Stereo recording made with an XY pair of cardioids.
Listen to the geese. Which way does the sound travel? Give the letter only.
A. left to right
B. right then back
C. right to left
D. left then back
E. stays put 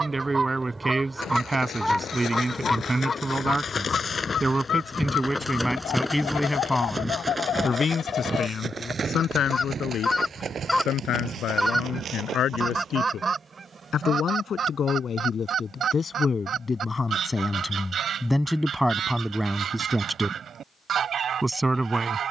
D.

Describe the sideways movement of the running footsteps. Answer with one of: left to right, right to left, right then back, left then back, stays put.
left to right.